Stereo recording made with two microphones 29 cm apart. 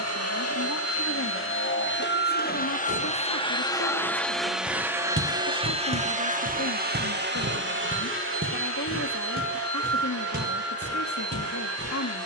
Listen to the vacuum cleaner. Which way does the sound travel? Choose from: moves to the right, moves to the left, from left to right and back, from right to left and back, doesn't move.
moves to the right.